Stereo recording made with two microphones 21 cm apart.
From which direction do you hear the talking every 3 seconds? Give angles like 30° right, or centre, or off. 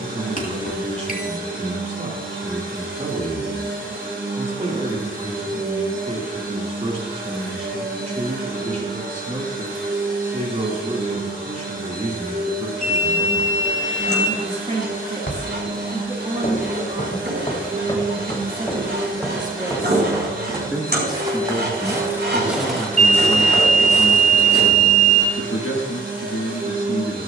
30° right, 30° right, 30° right, 30° right, 30° right, 30° right, 20° right, 20° left, 60° left.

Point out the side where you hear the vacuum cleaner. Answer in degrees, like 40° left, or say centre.
40° right.